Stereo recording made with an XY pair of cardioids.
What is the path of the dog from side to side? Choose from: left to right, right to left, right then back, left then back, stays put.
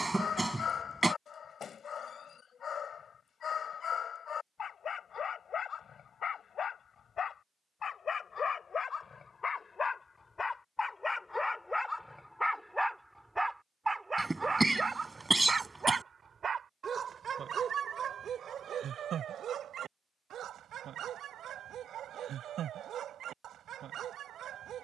left to right.